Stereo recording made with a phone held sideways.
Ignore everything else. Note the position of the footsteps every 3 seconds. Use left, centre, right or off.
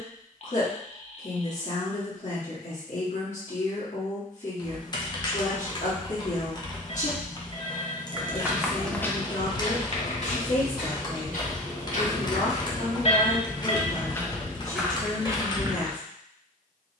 off, off, centre, left, left, right.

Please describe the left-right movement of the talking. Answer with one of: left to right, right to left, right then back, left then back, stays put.
stays put.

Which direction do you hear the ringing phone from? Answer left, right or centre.
left.